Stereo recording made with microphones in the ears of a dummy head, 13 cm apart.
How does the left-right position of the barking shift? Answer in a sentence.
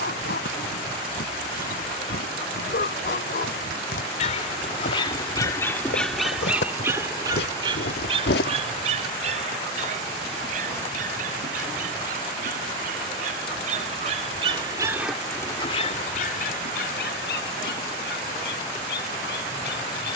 In this clip you hear the barking move from left to right and back again.